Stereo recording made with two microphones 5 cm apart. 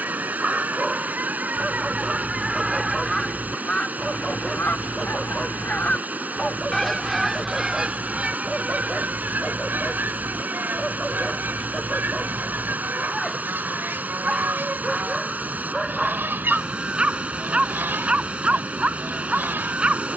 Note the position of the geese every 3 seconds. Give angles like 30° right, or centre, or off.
30° right, 30° left, 10° right, 40° right, 40° right, 40° right, 40° right.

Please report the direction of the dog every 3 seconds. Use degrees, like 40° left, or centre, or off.
10° right, centre, 10° left, 10° left, centre, 20° right, 20° right.